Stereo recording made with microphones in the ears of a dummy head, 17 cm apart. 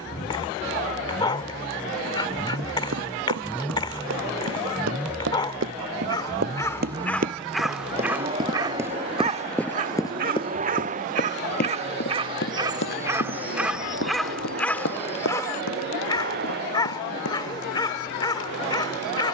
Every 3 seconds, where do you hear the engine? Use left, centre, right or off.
left, centre, right, right, right, right, right.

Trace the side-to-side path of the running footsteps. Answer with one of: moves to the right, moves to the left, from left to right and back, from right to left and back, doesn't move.
moves to the left.